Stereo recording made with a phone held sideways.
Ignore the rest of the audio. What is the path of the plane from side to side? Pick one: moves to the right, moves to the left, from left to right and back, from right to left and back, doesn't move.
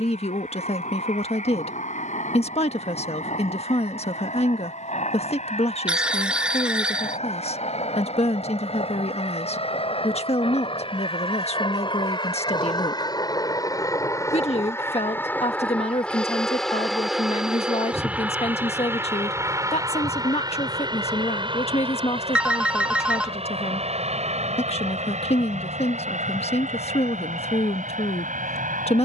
moves to the right.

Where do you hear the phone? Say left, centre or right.
centre.